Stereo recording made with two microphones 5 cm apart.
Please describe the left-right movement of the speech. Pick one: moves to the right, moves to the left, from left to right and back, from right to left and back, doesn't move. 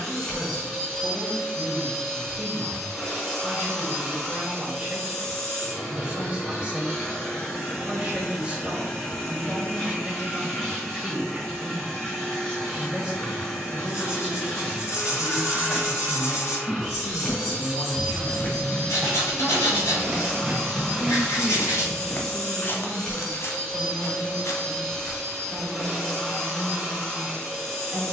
from right to left and back.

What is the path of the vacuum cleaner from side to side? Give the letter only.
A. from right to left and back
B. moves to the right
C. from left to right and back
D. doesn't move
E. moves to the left
D.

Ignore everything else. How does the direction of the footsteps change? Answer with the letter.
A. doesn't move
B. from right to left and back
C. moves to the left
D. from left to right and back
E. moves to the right
D.